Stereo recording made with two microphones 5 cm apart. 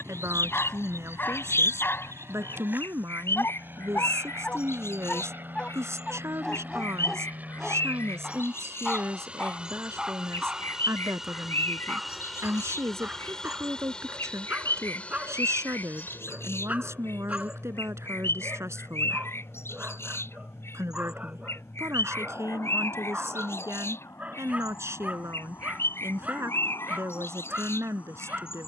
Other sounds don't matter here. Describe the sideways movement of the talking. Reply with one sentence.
You can hear the talking stay put.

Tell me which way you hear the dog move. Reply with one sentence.
You can hear the dog move to the right.